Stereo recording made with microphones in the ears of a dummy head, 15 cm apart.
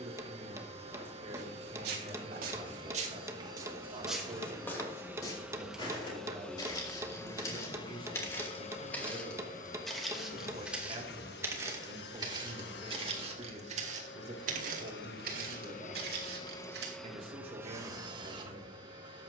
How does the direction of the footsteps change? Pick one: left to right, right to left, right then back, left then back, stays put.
left then back.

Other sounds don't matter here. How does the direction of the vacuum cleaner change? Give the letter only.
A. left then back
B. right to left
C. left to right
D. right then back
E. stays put
A.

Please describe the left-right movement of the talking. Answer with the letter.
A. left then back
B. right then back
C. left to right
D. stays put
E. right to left
D.